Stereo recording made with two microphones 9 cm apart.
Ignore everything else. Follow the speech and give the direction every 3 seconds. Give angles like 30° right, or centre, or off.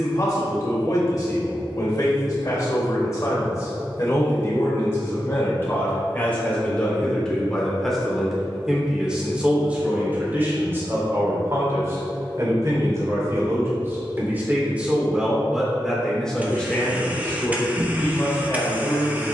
40° left, 30° left, 10° left, 20° right, 30° right, 10° left, 40° left.